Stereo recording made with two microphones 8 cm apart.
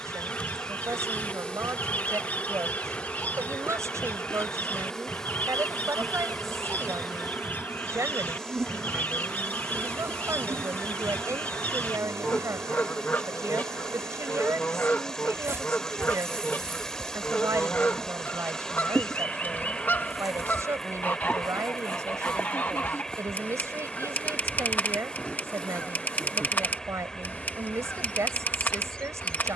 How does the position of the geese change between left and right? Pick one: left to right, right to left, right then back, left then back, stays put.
stays put.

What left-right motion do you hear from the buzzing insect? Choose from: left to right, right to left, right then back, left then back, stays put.
right then back.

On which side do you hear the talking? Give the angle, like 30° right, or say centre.
40° right.